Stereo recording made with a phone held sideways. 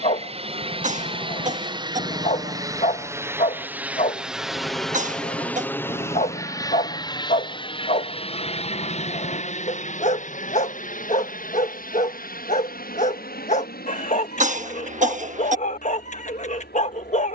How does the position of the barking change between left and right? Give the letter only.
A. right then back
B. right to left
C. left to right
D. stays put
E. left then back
D.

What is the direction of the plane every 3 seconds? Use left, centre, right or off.
right, centre, left, left, left, left.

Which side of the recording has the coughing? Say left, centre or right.
right.